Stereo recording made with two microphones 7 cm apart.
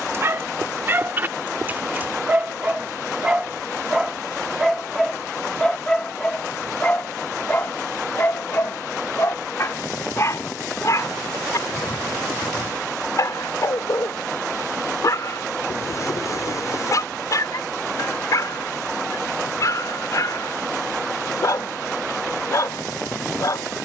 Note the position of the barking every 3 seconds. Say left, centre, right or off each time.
right, centre, left, left, left, left, left, left.